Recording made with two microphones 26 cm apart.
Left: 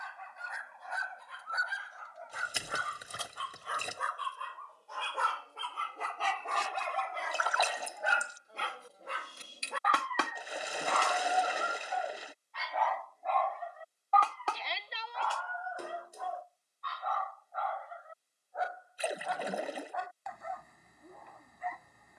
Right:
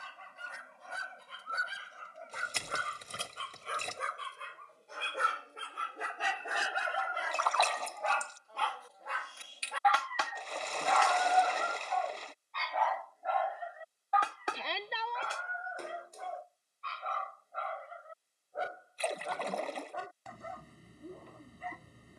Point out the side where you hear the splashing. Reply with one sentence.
You can hear the splashing in the centre.